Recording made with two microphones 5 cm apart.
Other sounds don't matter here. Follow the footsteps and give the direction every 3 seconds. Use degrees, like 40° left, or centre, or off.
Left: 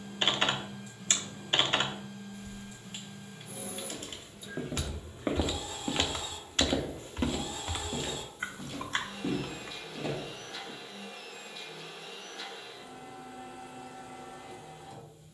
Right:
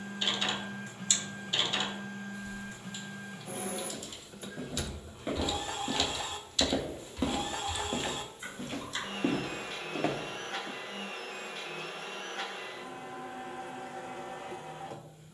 off, 40° left, 10° right, 50° right, off.